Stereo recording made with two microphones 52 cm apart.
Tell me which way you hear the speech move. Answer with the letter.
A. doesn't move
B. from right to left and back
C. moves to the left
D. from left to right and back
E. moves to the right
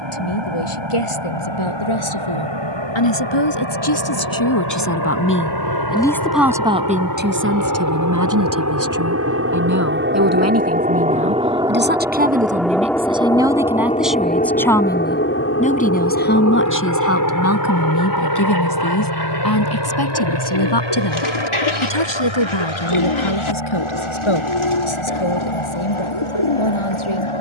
D.